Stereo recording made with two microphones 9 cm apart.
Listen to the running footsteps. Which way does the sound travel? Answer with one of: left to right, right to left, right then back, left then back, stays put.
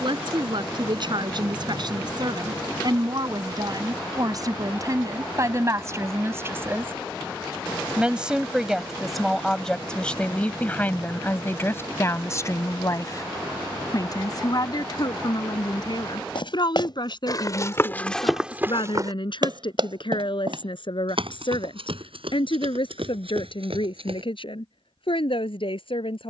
left to right.